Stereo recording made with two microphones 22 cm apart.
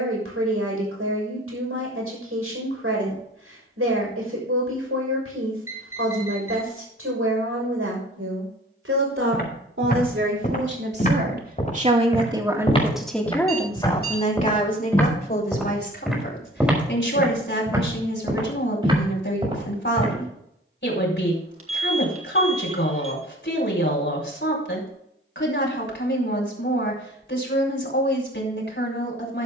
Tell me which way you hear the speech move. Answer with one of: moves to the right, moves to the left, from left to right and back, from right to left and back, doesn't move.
moves to the left.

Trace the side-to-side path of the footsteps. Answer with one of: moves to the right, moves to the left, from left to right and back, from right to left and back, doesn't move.
moves to the right.